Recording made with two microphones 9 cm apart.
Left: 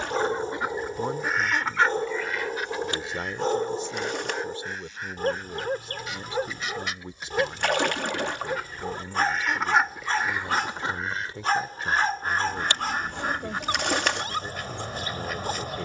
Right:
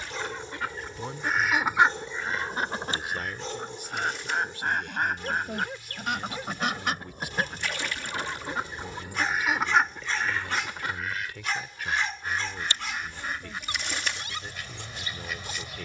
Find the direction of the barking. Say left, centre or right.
left.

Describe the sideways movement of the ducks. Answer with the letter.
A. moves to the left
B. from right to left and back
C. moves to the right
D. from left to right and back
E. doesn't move
D.